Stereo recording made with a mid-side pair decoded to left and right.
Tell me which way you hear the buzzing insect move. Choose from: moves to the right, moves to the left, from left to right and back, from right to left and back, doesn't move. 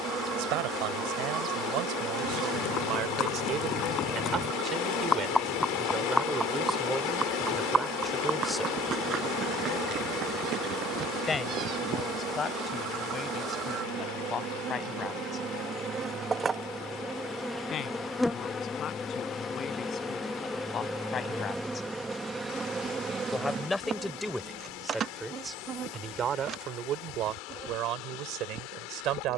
from right to left and back.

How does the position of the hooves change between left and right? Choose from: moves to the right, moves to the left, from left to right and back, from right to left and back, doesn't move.
moves to the right.